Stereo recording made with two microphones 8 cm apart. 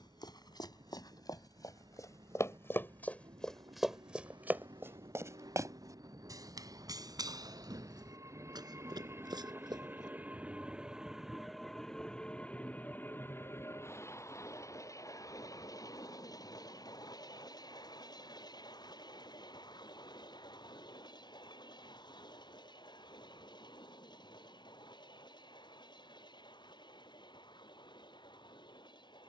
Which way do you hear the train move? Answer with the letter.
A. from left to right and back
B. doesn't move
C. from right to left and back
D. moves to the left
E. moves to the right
D.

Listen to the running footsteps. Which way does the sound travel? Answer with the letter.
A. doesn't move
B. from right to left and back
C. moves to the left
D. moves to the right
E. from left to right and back
D.